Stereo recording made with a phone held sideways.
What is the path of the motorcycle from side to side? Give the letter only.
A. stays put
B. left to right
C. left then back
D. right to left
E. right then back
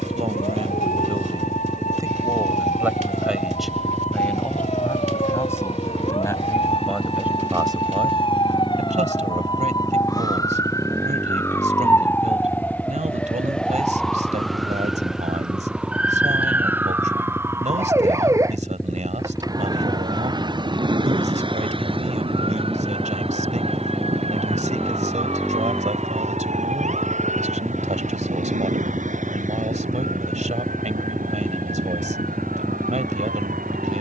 A.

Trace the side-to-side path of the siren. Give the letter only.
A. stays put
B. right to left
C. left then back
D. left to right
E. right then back
D.